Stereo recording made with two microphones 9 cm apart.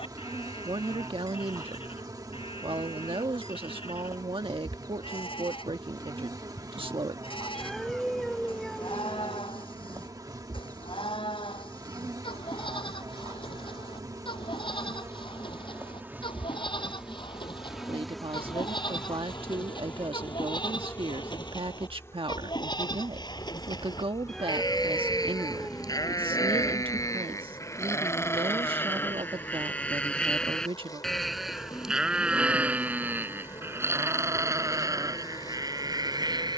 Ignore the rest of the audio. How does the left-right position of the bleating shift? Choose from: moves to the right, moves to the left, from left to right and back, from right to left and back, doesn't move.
moves to the right.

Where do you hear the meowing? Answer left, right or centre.
centre.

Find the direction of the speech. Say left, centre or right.
right.